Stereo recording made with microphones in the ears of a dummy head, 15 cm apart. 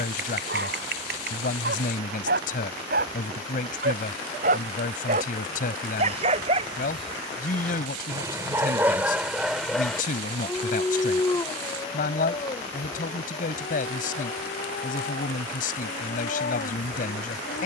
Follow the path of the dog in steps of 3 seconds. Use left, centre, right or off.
right, right, right, centre, left, left.